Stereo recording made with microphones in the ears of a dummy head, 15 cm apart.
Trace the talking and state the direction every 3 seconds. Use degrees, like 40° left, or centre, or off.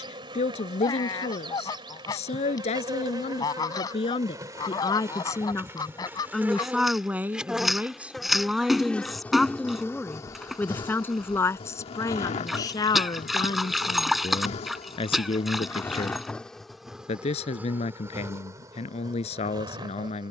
40° left, 30° left, 10° right, 10° left, 30° left, 40° left, 40° left.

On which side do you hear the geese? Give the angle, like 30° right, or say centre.
20° left.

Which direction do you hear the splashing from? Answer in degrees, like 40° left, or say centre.
centre.